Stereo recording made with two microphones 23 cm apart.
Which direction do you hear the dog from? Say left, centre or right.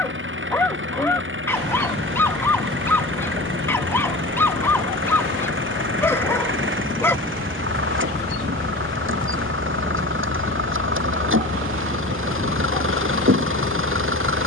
centre.